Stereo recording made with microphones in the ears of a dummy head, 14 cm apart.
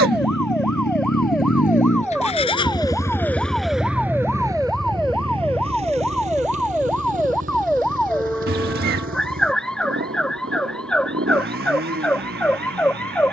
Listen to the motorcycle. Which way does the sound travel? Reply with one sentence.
You can hear the motorcycle go from the left side to the right.